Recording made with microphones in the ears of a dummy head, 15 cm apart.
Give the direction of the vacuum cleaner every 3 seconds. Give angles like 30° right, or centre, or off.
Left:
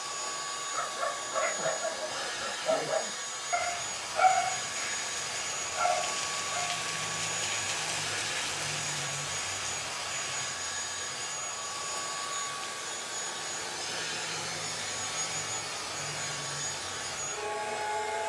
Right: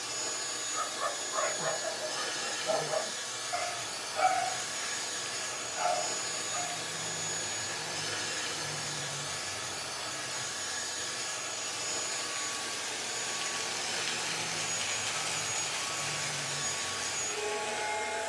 30° right, 30° right, 30° right, 30° right, 10° right, 10° right.